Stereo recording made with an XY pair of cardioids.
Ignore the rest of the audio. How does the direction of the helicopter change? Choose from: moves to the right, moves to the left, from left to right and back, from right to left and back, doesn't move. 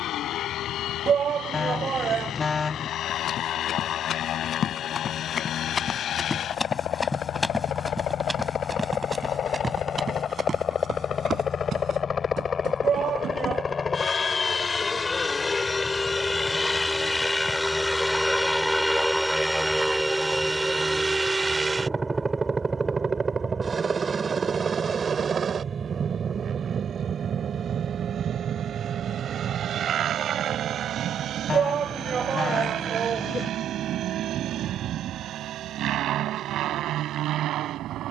moves to the right.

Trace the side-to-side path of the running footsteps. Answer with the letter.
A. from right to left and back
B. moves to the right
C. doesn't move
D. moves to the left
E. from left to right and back
B.